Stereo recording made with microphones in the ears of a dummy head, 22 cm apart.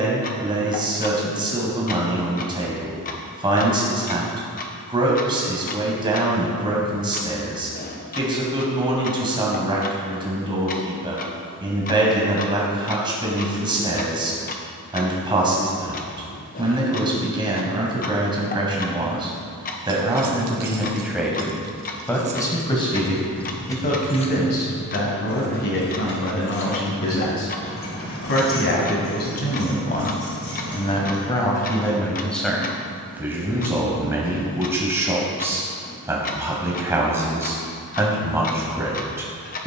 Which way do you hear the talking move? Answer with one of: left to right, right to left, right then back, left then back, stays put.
left then back.